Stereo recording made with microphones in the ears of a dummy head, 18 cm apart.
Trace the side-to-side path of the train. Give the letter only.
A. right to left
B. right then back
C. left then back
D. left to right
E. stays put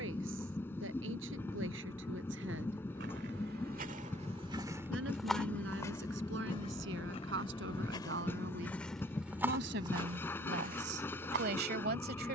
E.